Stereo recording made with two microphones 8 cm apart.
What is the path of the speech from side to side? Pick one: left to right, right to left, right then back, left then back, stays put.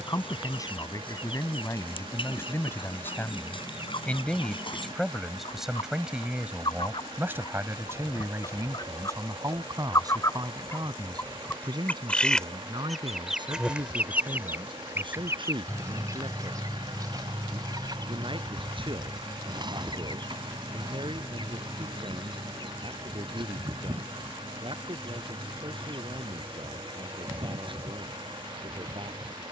left to right.